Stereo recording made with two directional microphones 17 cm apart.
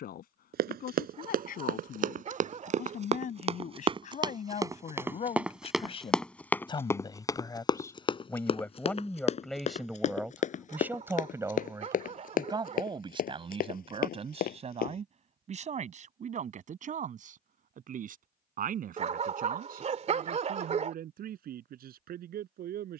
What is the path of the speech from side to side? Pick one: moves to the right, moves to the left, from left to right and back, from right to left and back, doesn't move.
moves to the right.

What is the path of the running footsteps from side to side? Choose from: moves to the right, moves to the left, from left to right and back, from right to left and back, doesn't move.
moves to the left.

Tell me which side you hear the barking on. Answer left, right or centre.
right.